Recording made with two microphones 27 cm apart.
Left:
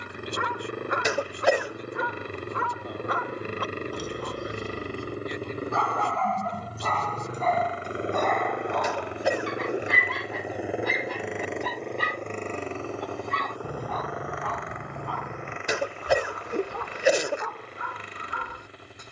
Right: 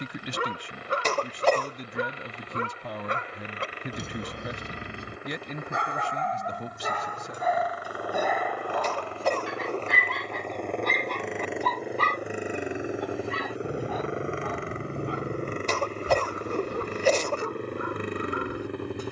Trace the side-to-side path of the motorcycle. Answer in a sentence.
You can hear the motorcycle travel towards the right.